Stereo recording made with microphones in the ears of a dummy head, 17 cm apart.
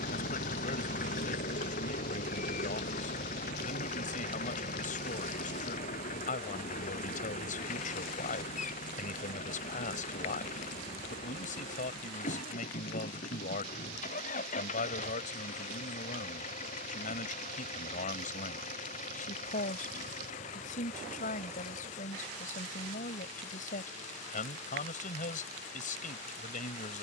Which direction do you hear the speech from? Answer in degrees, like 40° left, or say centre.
50° left.